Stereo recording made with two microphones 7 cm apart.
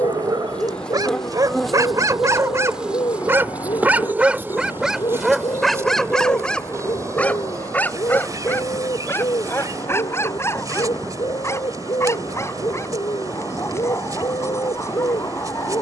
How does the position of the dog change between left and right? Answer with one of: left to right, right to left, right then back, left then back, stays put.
right to left.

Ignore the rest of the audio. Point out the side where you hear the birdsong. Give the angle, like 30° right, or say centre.
70° left.